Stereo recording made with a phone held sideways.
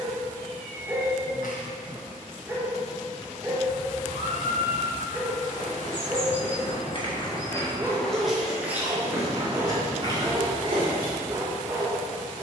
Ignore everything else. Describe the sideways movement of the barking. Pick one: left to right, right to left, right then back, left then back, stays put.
stays put.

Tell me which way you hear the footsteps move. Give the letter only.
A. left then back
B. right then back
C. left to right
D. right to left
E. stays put
C.